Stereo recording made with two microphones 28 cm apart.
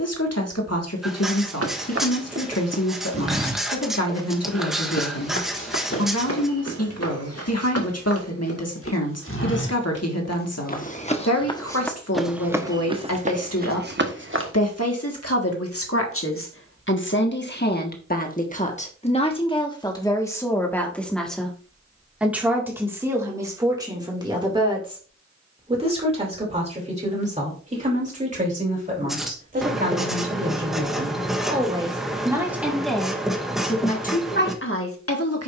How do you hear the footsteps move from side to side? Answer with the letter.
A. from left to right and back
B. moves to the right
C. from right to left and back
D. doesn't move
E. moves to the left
C.